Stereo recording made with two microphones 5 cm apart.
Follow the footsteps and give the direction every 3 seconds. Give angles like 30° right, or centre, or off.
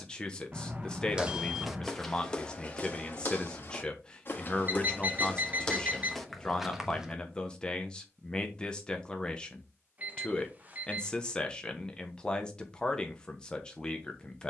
10° left, 30° left, centre, off, off.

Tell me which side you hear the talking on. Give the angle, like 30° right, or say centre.
20° left.